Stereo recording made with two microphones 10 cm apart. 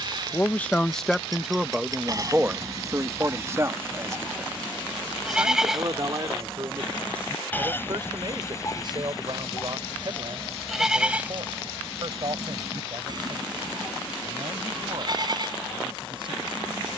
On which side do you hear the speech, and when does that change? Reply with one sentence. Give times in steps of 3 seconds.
You can hear the speech in the centre from 0 s and on the right from 3 s.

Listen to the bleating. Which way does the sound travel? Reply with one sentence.
You can hear the bleating move from right to left and back again.